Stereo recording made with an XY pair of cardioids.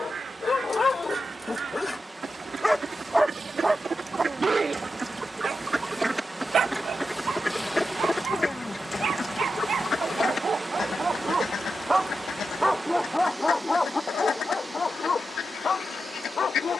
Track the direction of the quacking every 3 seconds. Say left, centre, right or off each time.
right, right, centre, left, left, left.